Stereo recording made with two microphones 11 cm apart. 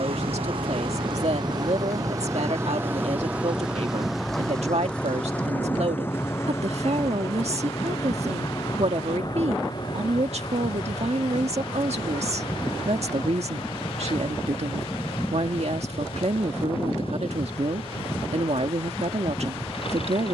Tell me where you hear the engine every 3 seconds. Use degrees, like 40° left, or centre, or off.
40° right, centre, 30° left, 40° left, 50° left, 50° left, 50° left.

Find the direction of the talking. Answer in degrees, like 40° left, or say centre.
70° right.